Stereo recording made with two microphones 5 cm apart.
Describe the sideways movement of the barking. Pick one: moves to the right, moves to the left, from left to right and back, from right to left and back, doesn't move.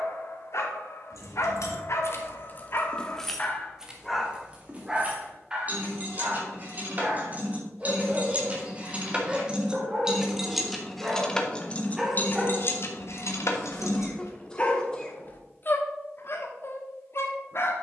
from left to right and back.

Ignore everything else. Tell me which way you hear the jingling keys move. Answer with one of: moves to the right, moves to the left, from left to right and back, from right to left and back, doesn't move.
from left to right and back.